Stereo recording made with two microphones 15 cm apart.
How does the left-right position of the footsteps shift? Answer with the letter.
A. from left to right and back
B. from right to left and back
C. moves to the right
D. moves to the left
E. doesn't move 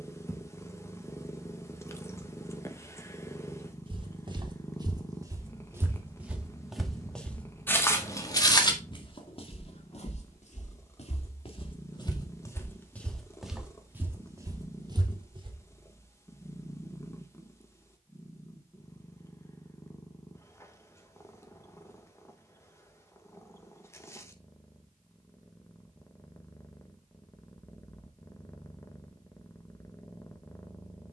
B.